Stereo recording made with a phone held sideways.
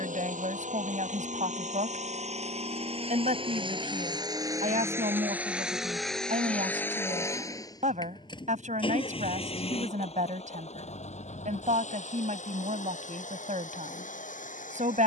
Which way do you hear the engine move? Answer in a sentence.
You can hear the engine move to the left.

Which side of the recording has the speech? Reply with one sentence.
In this clip you hear the speech on the right.